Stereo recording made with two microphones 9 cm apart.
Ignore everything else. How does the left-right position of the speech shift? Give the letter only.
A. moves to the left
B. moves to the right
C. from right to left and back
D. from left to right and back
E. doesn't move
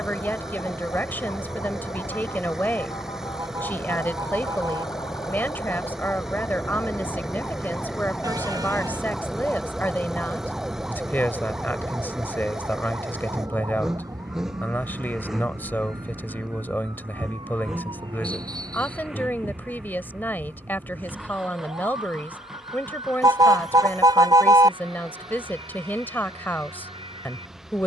E.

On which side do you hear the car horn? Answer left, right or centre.
right.